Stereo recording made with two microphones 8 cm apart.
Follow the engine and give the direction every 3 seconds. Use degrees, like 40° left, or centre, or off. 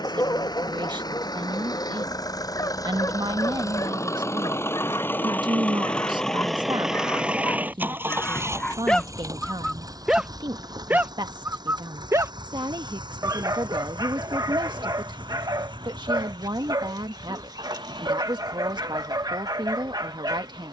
60° left, 30° left, 20° right, 50° right, 70° right, 80° right, 80° right.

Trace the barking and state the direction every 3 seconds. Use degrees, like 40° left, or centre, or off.
50° left, 50° left, 30° left, 20° right, 50° right, 60° right, 60° right.